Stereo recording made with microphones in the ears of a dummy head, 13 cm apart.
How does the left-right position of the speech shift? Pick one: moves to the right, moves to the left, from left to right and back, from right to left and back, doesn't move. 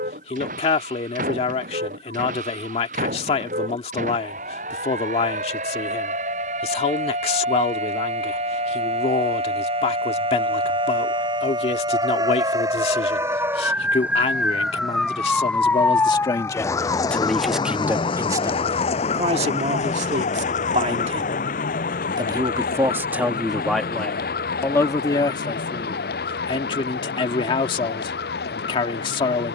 from left to right and back.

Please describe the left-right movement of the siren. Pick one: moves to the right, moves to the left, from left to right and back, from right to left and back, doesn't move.
moves to the left.